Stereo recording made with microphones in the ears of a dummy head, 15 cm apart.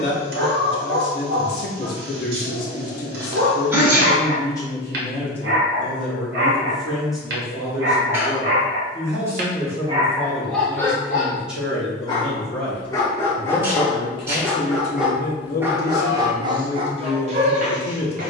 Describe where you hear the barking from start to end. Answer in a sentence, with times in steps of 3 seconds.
You can hear the barking on the right from 0 s, in the centre from 9 s and on the right from 15 s.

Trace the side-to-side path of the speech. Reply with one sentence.
You can hear the speech go right and come back.